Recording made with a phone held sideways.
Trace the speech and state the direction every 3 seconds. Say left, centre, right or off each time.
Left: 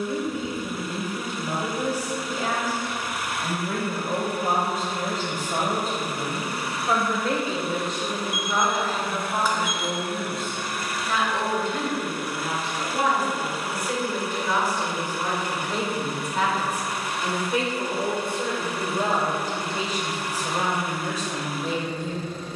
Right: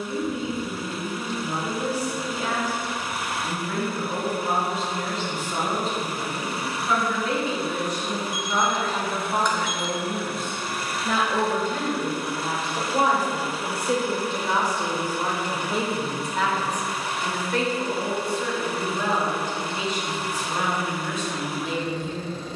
left, left, left, right, right, centre, left, left.